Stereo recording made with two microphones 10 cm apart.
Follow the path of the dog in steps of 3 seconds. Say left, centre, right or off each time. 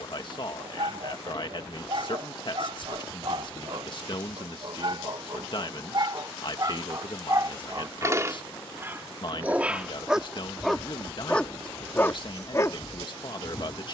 right, right, right, centre, left.